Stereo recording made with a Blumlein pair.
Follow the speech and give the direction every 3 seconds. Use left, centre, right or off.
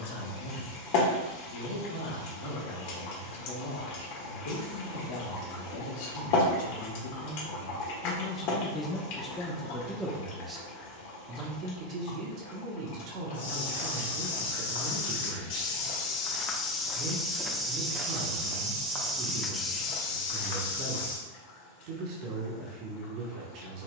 left, left, left, centre, right, right, right, right.